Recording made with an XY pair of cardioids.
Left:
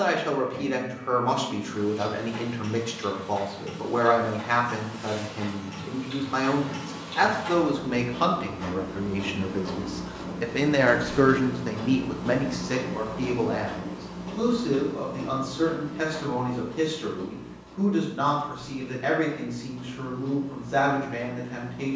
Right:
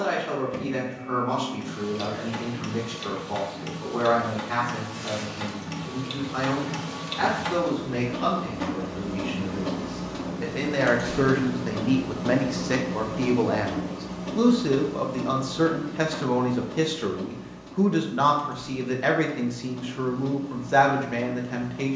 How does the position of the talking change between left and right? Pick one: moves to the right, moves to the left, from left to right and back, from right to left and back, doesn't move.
moves to the right.